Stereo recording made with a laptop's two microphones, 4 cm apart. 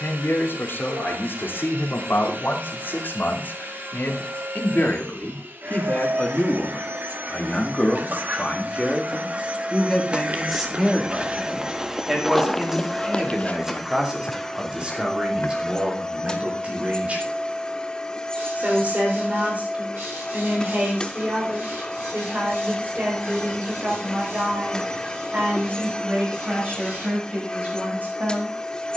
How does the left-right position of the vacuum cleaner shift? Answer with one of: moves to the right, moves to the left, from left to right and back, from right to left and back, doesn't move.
moves to the left.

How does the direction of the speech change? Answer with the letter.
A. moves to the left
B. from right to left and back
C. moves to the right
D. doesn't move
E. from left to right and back
C.